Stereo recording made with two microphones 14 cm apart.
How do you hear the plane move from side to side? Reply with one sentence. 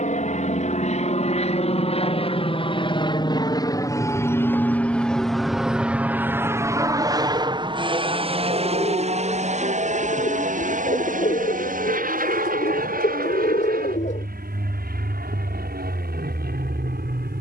You can hear the plane move to the right.